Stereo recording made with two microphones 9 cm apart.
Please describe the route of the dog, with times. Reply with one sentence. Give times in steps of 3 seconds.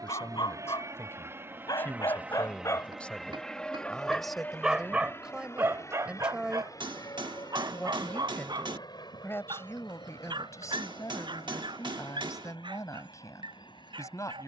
In this clip you hear the dog on the left from 0 s, in the centre from 3 s and on the right from 6 s.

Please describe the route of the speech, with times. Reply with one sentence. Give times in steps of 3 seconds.
In this clip you hear the speech on the left from 0 s, in the centre from 3 s and on the left from 9 s.